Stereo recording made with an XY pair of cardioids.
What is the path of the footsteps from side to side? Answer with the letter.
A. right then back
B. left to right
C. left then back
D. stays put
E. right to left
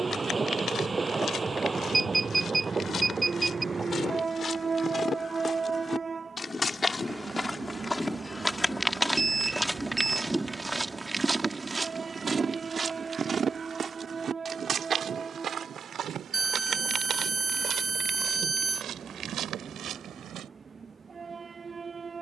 B.